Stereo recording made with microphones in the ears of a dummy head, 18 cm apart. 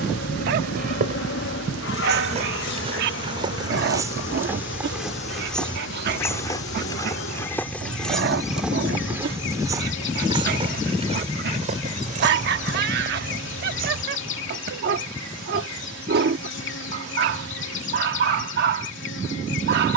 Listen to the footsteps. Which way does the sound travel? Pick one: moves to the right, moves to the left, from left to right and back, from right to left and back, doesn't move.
from right to left and back.